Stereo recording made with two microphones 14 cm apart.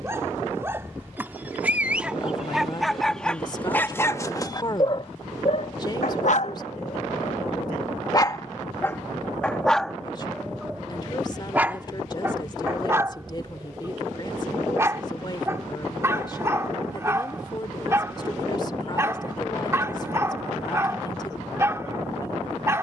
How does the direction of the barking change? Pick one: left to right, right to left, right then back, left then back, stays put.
left then back.